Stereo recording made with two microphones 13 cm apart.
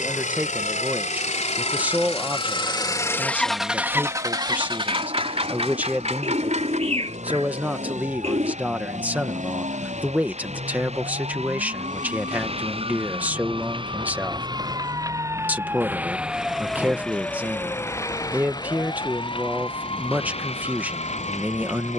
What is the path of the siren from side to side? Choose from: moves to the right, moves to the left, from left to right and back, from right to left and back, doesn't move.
moves to the left.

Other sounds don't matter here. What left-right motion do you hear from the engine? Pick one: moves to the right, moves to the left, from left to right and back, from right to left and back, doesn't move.
moves to the right.